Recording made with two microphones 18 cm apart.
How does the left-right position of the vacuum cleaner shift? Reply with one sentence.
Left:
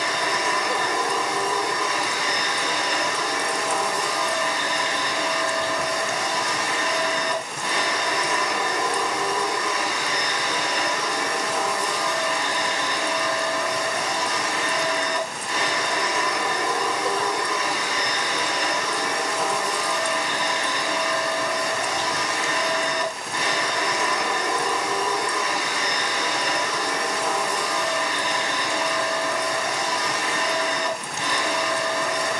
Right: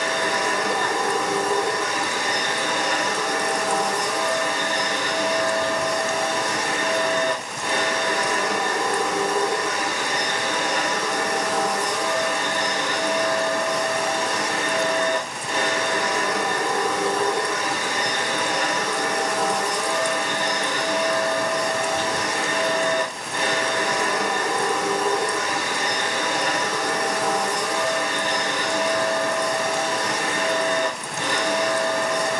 You can hear the vacuum cleaner stay in one place.